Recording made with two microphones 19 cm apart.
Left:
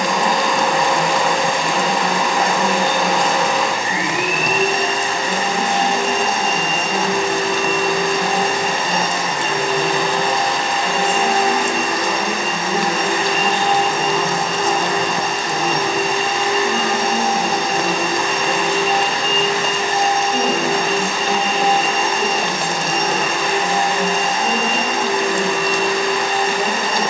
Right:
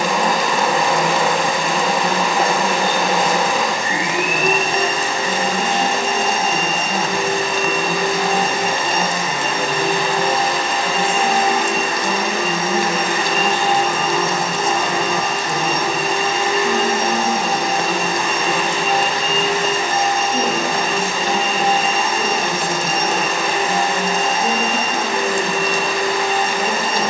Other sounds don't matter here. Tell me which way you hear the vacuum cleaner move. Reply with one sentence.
You can hear the vacuum cleaner stay in one place.